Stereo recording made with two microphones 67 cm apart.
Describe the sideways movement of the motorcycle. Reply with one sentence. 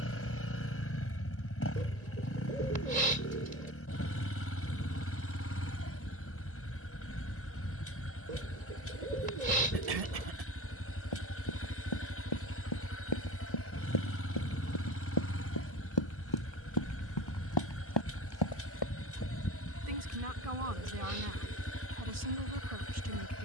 You can hear the motorcycle stay put.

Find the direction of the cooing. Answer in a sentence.
You can hear the cooing on the right.